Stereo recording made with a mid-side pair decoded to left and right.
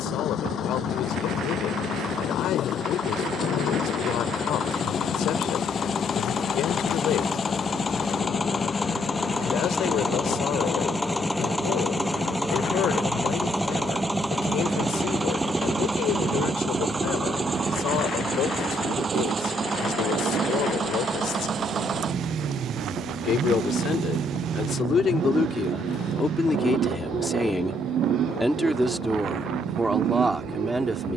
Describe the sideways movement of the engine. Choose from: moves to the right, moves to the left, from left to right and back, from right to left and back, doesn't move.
moves to the right.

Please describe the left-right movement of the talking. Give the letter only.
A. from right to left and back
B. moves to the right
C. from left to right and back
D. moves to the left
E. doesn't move
B.